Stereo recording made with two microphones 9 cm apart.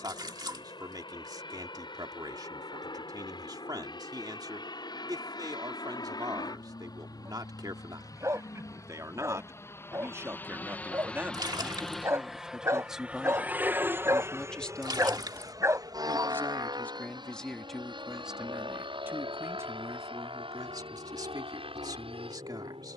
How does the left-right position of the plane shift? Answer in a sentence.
In this clip you hear the plane travel towards the right.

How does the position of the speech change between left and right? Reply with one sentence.
In this clip you hear the speech go left and come back.